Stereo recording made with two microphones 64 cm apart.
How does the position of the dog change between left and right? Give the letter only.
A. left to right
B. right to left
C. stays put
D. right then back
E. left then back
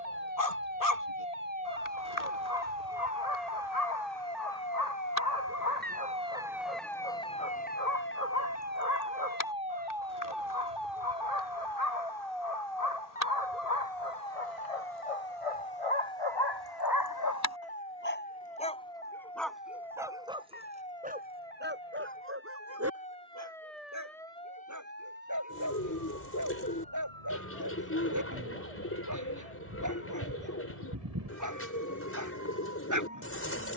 A.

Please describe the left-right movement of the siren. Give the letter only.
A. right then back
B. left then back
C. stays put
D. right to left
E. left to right
D.